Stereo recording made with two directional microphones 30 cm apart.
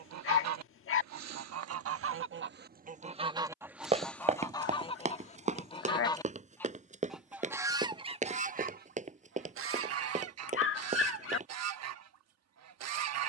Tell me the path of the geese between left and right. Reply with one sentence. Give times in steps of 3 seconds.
In this clip you hear the geese on the right from 0 s, in the centre from 3 s and on the right from 9 s.